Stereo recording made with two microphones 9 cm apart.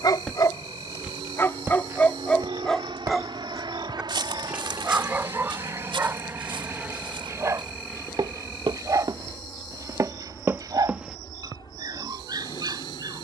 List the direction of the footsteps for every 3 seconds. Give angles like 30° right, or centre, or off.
20° right, 60° right, 60° right, 30° right, off.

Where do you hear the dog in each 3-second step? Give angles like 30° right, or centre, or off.
20° left, 20° right, 30° right, 40° right, 50° right.